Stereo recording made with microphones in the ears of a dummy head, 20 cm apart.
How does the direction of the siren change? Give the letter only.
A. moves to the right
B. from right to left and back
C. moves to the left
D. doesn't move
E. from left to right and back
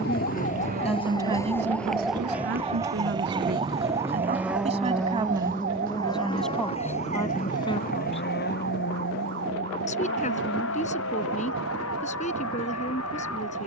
A.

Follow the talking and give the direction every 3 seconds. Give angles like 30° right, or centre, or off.
30° right, 30° right, 10° left, 30° left, 30° left.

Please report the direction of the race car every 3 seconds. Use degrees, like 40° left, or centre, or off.
40° right, 10° right, 40° left, 60° left, 70° left.